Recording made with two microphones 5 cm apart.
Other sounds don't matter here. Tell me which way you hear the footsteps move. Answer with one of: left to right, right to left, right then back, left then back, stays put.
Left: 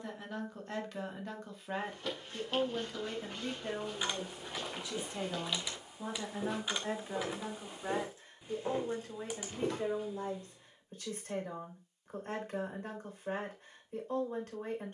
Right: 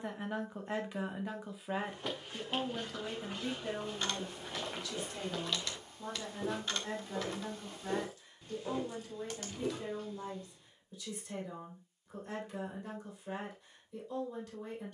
right to left.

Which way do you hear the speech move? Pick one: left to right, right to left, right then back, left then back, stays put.
right to left.